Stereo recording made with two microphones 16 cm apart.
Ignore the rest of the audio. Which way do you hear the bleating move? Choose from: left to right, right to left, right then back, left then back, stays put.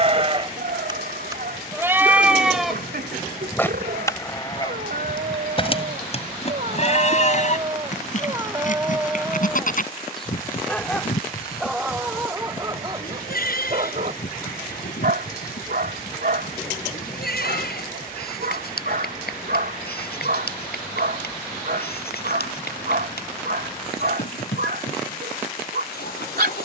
right to left.